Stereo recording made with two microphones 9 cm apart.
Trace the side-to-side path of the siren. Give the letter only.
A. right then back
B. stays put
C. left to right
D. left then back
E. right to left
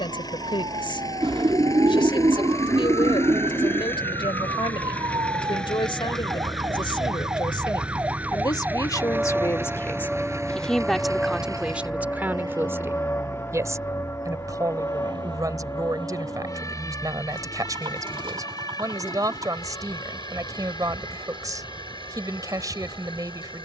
E.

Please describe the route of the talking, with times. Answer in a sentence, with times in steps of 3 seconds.
In this clip you hear the talking on the left from 0 s, in the centre from 9 s and on the right from 12 s.